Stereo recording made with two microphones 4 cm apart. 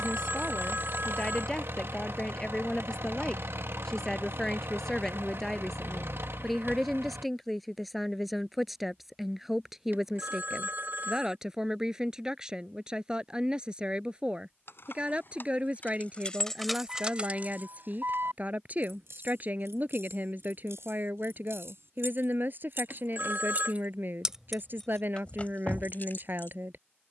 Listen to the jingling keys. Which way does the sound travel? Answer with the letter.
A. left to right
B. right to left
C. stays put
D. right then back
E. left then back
D.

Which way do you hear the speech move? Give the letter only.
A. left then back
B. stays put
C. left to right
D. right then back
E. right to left
C.